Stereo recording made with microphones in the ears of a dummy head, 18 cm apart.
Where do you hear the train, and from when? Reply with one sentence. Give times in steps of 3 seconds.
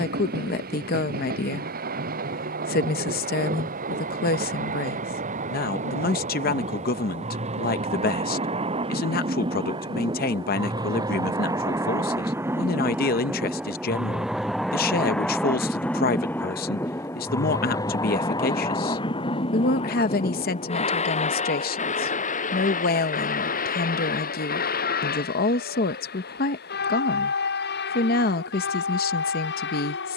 In this clip you hear the train on the right from 0 s, in the centre from 12 s and on the left from 18 s.